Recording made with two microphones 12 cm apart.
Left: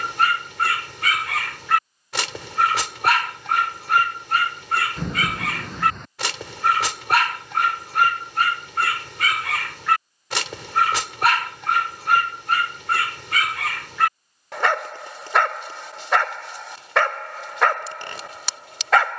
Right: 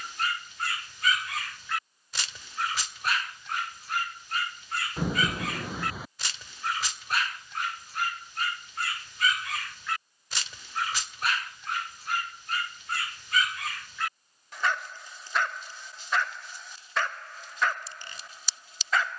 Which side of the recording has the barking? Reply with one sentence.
In this clip you hear the barking on the left.